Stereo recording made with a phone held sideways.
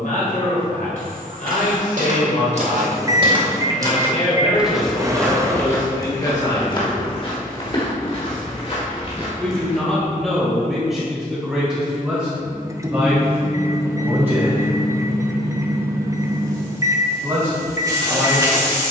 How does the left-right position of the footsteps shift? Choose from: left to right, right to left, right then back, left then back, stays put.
right to left.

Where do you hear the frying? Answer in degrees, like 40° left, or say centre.
30° right.